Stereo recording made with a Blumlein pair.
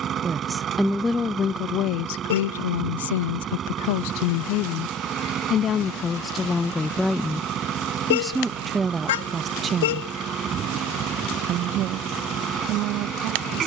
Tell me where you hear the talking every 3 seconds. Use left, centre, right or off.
left, left, centre, right, right.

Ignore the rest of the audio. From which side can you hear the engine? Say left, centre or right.
right.